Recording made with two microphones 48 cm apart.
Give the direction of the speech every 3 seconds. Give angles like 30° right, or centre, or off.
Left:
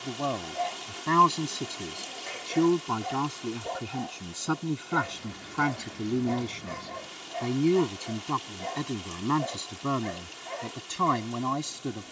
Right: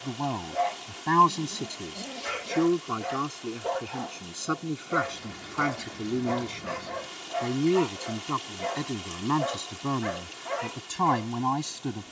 centre, 10° left, 10° left, 10° right.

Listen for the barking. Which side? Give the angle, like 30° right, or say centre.
80° right.